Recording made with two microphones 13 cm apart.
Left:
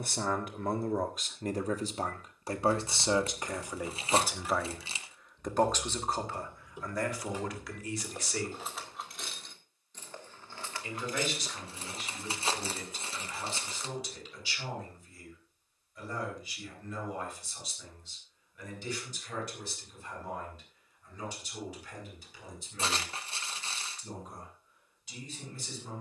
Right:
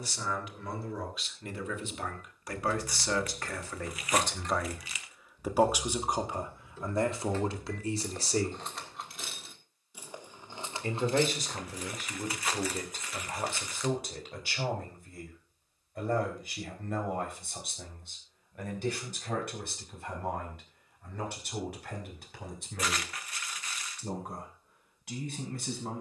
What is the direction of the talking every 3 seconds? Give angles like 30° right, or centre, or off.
40° left, centre, 30° right, 50° right, 50° right, 60° right, 60° right, 60° right, 70° right.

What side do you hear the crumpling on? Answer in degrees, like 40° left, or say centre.
30° left.